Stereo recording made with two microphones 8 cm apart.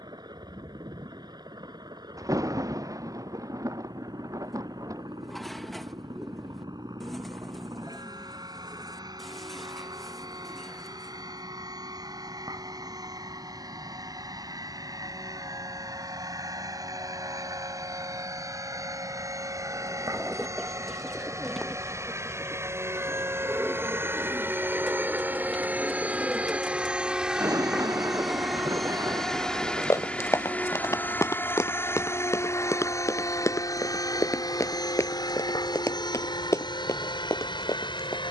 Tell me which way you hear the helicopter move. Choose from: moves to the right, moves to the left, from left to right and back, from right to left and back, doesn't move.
moves to the left.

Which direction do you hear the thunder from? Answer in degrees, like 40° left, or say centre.
40° right.